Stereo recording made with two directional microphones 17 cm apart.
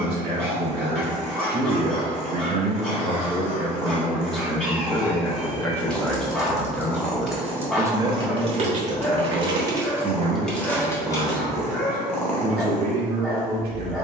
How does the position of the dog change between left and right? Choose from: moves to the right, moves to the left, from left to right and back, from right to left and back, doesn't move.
doesn't move.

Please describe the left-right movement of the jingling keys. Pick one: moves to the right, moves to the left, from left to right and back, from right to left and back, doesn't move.
from left to right and back.